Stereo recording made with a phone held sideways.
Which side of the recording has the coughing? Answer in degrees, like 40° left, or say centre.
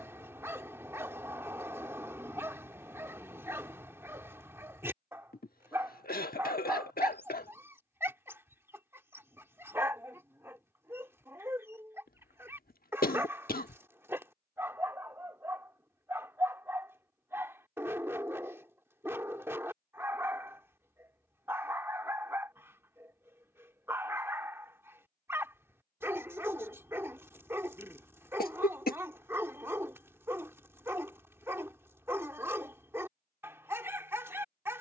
60° left.